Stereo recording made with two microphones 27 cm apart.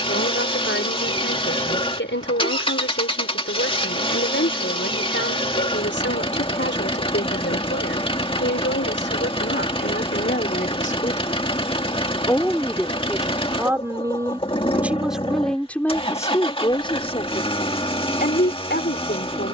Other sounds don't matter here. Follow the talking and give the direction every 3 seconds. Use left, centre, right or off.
left, left, left, left, centre, centre, left.